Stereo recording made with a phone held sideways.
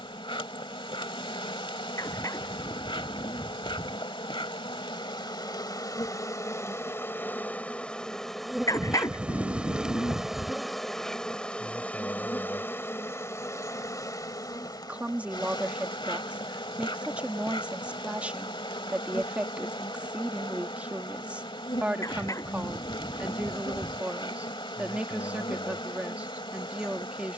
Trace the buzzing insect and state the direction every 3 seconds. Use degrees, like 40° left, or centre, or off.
40° left, 30° left, 10° left, centre, 20° left, 40° left, 40° left, 40° left, 40° left.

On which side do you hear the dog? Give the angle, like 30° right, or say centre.
20° left.